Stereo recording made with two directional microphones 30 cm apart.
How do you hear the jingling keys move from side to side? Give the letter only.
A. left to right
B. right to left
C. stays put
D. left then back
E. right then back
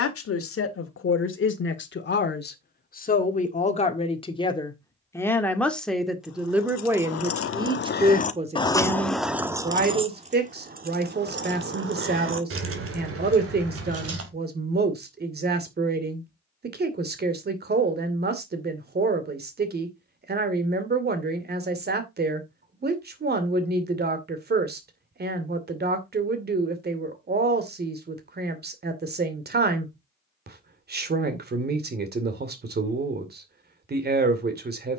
A.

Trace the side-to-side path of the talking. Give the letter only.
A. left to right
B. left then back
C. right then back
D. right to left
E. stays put
A.